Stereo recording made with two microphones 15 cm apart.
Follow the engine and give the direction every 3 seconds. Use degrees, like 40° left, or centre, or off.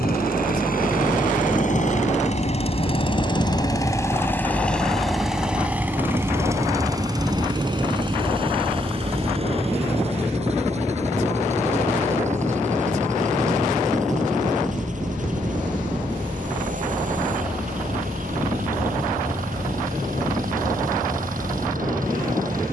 60° left, 10° left, 30° right, 40° right, 50° right, 50° right, 60° right, 60° right.